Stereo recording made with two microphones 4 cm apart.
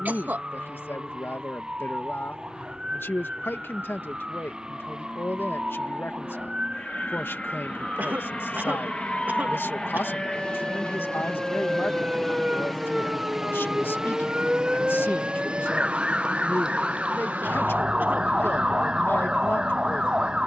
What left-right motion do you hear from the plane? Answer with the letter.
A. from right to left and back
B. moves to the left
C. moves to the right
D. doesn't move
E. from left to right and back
C.